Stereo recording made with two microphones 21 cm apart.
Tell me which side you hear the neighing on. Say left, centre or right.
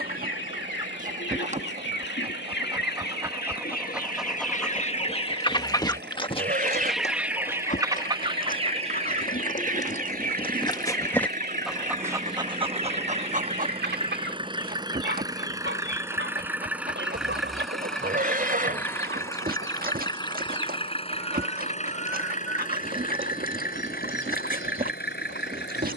right.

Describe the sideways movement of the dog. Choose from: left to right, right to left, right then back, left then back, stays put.
left then back.